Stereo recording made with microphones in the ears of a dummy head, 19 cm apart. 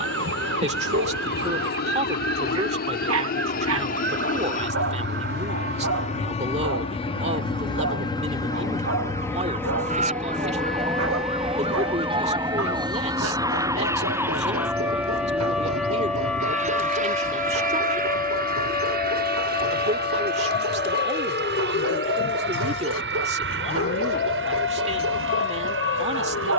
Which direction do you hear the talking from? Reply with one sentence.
You can hear the talking on the right.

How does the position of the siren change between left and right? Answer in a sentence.
In this clip you hear the siren move to the left.